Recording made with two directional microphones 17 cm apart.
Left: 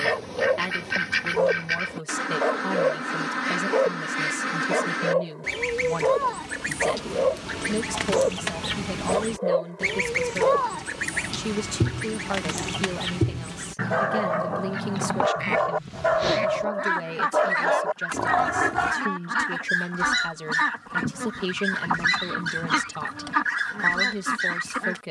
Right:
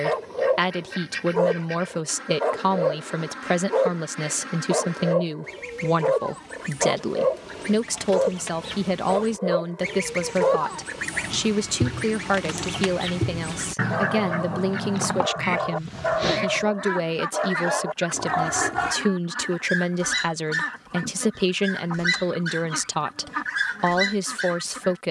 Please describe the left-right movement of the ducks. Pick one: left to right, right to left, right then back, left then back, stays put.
right then back.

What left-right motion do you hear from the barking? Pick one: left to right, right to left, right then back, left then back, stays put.
left then back.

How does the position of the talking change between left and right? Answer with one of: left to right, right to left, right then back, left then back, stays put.
stays put.